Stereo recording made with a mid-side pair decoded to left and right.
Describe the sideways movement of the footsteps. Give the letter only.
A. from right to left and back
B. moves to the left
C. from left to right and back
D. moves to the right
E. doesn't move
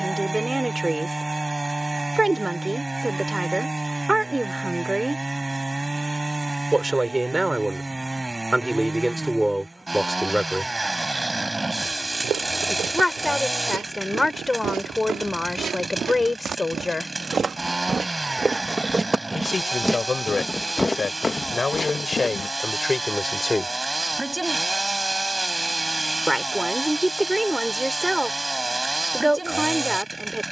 B.